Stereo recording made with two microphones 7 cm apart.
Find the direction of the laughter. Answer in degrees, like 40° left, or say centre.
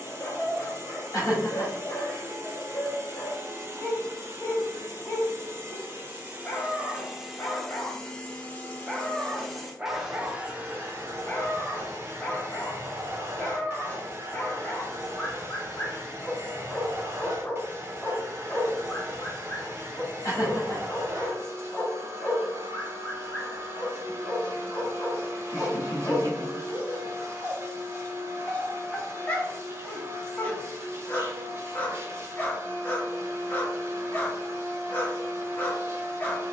50° left.